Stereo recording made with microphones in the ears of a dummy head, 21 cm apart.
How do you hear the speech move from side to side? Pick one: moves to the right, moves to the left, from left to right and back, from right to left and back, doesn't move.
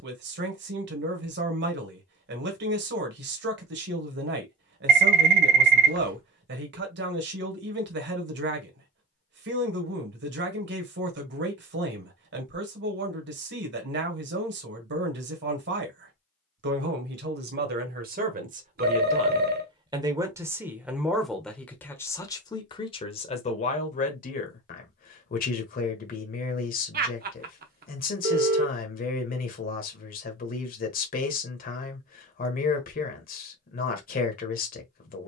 moves to the left.